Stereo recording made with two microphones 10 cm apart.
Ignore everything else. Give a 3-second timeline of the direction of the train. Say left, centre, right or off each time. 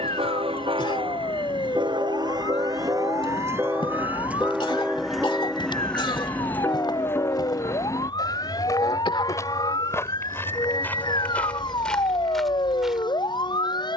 right, centre, left, left, left.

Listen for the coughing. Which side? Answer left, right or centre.
left.